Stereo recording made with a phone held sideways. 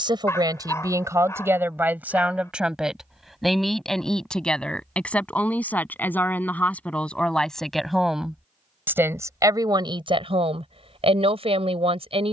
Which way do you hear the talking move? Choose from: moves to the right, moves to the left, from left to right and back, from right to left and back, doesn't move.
from right to left and back.